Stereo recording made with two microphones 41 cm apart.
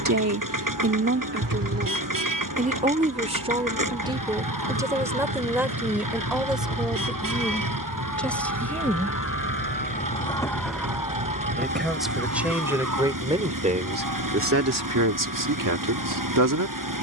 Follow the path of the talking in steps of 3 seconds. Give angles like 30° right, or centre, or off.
30° right, 10° right, centre, centre, 20° right, 50° right.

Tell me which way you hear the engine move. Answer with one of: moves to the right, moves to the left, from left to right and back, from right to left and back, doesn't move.
doesn't move.